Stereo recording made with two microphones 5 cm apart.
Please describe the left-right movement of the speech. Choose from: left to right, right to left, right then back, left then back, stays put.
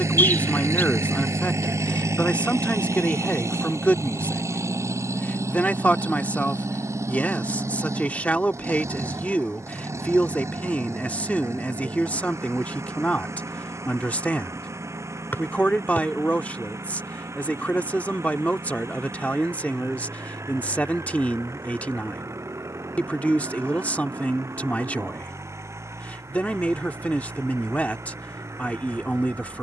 stays put.